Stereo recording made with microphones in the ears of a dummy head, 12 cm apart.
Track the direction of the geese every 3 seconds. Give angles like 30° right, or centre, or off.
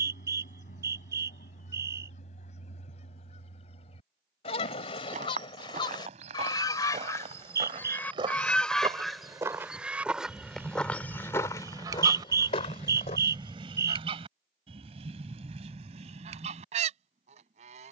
60° left, 50° left, 20° left, 20° right, 40° right, 50° right.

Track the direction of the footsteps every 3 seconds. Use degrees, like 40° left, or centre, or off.
off, 50° right, 40° right, centre, 40° left, off.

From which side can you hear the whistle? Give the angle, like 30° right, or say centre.
20° right.